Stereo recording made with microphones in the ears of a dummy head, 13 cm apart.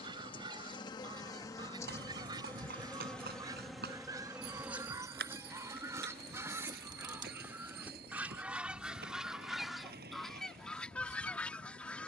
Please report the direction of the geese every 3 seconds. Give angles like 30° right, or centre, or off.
30° right, 20° right, 10° right, centre.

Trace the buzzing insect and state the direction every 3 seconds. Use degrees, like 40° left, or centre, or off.
20° left, 10° right, 30° right, 40° right.